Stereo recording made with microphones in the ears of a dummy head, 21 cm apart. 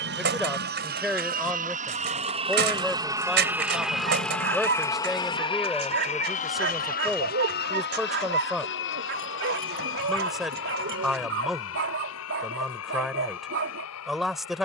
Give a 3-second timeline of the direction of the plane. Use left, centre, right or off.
right, centre, left, left, left.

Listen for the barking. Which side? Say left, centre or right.
right.